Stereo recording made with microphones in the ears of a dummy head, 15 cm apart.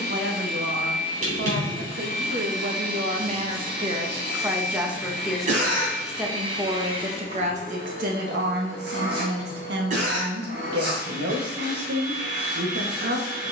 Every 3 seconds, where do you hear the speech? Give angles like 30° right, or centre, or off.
70° right, 20° right, 40° right, 70° right, 70° right.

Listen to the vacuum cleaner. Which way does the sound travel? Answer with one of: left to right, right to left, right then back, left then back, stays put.
stays put.